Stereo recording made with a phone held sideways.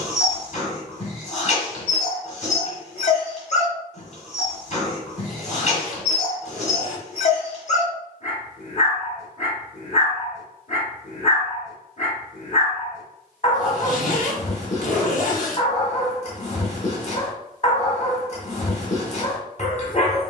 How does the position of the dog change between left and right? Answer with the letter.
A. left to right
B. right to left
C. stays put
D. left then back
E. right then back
C.